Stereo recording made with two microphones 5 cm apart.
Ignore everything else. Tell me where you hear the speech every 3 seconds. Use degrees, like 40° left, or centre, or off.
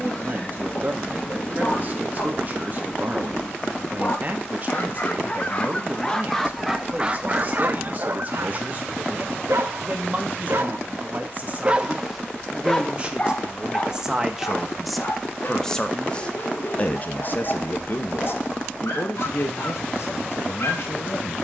40° right, 40° right, 40° right, 40° right, 20° right, 30° left, 60° left.